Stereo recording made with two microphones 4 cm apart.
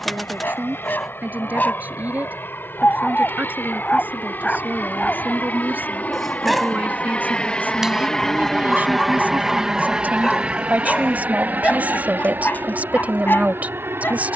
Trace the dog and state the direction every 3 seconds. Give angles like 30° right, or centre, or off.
50° left, 20° left, centre, 10° left, 50° left.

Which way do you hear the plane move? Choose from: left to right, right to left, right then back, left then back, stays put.
left to right.